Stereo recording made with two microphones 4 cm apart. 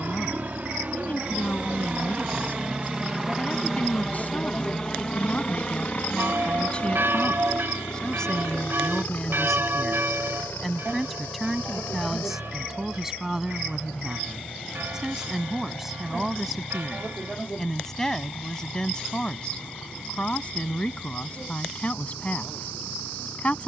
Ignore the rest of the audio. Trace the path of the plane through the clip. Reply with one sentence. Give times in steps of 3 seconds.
You can hear the plane on the right from 0 s, in the centre from 3 s and on the left from 6 s.